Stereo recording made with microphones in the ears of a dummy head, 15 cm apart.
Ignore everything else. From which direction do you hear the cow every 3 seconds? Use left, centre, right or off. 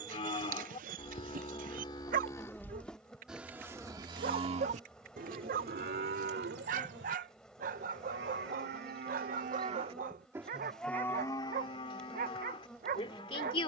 left, right, right, centre, left.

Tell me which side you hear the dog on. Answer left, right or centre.
right.